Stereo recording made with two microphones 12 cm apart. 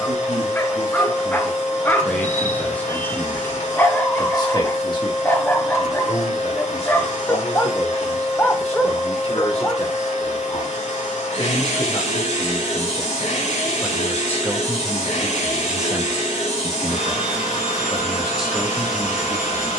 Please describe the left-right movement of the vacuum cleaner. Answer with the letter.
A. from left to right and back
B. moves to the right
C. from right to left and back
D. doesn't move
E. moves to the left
D.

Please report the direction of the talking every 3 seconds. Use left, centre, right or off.
centre, left, left, left, left, centre, centre.